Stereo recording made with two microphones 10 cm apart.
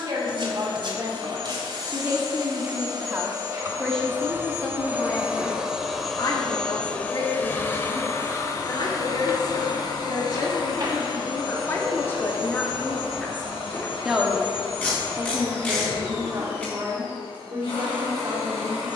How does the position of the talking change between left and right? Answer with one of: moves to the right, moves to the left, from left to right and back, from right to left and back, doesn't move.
from right to left and back.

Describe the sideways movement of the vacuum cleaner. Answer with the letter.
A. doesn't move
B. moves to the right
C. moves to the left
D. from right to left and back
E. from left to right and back
C.